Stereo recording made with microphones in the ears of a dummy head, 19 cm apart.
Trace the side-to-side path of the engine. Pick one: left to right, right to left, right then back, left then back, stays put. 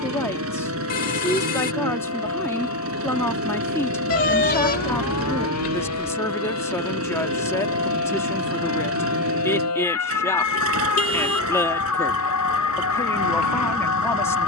stays put.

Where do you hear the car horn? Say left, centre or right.
left.